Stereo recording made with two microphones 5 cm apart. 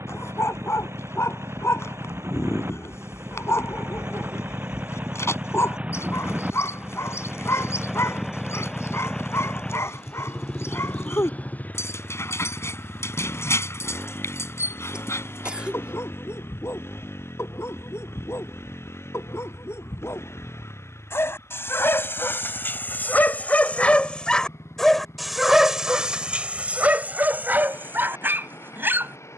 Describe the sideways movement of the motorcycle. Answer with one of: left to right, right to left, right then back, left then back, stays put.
right to left.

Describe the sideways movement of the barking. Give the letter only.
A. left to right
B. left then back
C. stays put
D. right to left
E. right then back
A.